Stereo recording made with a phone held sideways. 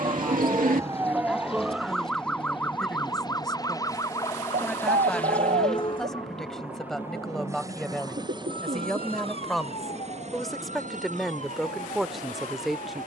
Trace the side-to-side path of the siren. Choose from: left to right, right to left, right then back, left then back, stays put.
right to left.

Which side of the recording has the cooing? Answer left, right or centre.
right.